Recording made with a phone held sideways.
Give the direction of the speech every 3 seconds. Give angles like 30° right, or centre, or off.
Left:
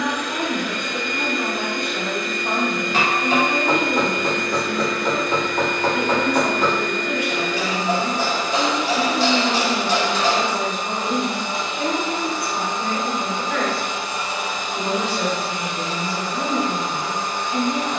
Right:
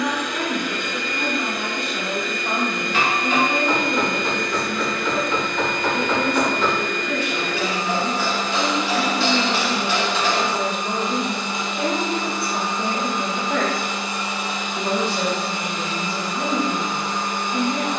20° left, 20° left, 20° left, centre, 30° right, centre.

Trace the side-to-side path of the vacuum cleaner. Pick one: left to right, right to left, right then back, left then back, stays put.
stays put.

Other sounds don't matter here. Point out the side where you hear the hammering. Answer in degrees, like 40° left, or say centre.
40° left.